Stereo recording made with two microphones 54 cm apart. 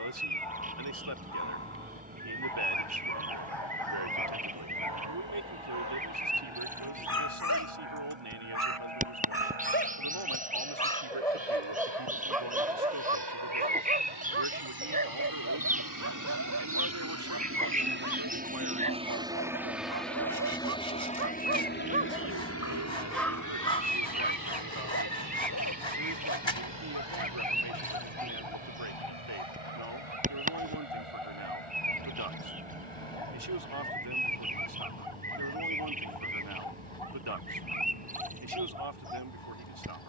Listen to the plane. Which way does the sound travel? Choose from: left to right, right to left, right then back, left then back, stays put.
right to left.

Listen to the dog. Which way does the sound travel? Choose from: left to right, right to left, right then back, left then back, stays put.
right then back.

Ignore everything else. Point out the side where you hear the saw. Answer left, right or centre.
left.